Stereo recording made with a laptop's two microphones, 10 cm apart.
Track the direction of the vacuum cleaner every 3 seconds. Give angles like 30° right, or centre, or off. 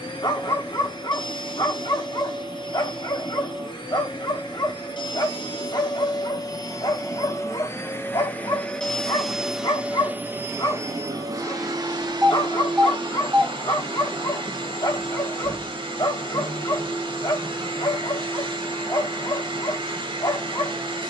60° left, 50° left, 30° left, 20° right, 60° right, 60° right, 60° right.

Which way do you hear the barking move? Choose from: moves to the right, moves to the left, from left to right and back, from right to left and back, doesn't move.
doesn't move.